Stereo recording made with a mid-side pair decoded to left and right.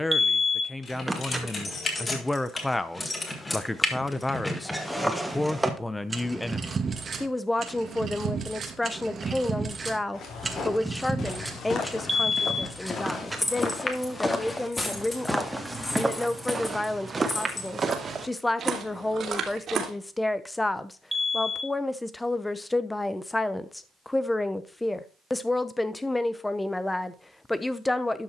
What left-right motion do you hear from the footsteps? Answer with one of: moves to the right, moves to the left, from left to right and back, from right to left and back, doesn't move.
moves to the right.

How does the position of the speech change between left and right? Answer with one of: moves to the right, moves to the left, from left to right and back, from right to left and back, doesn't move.
doesn't move.